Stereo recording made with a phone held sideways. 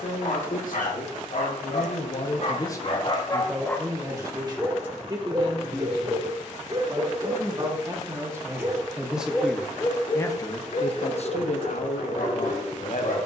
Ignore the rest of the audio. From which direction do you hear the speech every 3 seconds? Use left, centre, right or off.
left, right, right, left, left.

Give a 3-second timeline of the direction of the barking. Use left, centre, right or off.
left, centre, right, left, left.